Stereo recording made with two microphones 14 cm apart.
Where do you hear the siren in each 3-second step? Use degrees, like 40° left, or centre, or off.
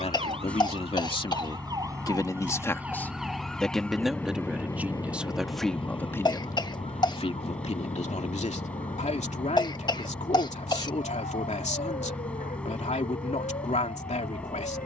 30° right, 20° left, 60° left, 70° left, 80° left.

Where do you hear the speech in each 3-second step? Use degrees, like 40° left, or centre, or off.
40° left, centre, 40° left, 60° left, 60° left.